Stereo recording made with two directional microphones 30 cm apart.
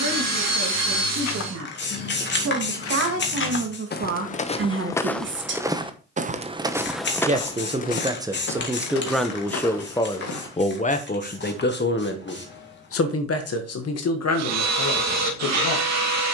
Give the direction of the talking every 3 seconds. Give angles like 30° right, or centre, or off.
60° right, 40° right, 10° right, 20° left, 50° left, 60° left.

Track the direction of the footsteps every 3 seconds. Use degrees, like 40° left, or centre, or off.
60° left, 20° left, 10° left, 60° left, off, off.